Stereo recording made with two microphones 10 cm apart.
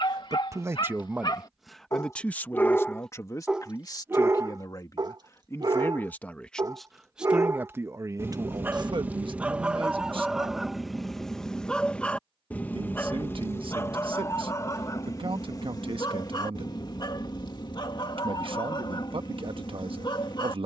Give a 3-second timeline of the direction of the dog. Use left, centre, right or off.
left, right, right, centre, left, left, left.